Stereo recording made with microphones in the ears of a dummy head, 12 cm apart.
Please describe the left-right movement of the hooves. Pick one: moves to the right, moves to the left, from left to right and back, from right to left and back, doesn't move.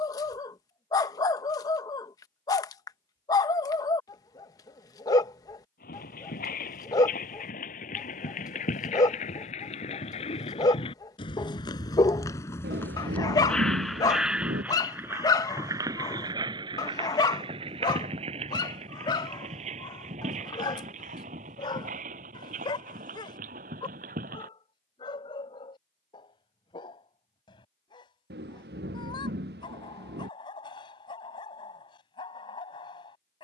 moves to the right.